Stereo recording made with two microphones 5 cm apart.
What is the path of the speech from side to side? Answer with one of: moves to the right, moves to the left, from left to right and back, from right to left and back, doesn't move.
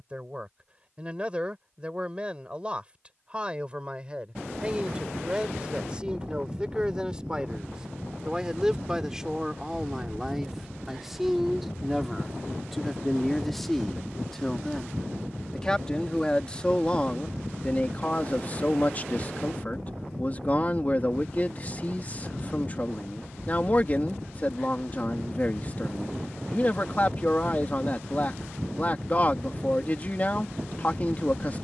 moves to the left.